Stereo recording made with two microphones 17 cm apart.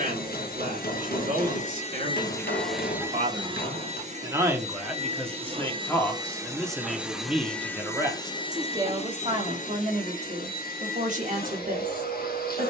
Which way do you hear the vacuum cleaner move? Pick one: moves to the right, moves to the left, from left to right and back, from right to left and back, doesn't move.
from left to right and back.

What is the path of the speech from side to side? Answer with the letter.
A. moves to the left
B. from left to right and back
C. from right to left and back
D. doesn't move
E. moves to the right
C.